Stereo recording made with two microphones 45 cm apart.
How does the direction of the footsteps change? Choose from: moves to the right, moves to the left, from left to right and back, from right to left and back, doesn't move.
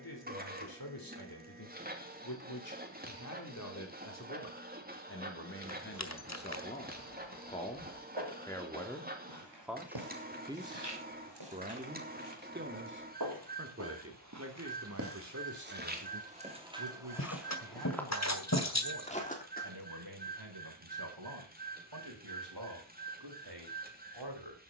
moves to the left.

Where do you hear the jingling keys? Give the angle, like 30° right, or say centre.
30° left.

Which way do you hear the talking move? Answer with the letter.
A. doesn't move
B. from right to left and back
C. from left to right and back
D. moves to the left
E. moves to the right
E.